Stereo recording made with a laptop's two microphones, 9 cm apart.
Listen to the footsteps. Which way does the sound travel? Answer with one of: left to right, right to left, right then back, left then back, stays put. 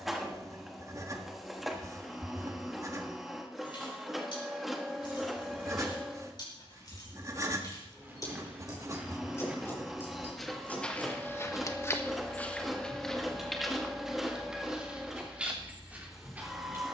left then back.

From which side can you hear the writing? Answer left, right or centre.
right.